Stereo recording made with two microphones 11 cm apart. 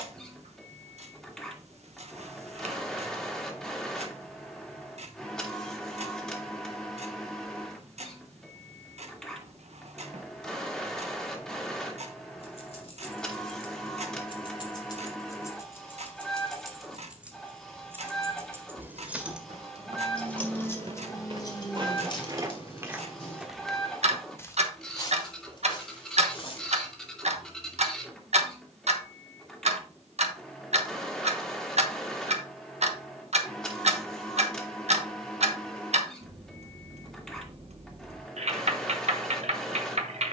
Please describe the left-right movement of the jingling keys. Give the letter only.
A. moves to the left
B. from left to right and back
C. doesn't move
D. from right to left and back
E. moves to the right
B.